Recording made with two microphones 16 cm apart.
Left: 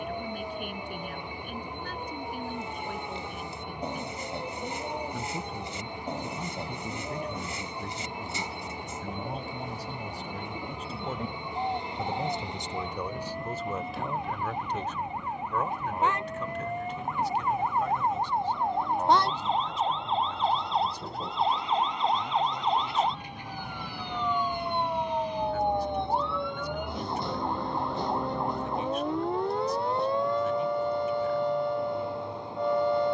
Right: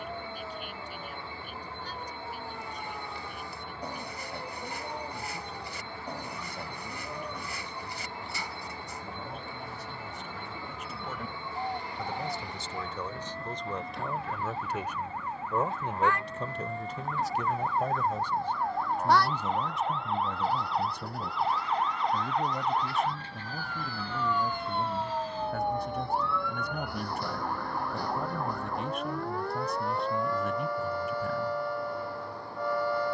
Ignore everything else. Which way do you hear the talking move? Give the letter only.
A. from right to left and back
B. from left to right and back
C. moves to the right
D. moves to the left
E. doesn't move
C.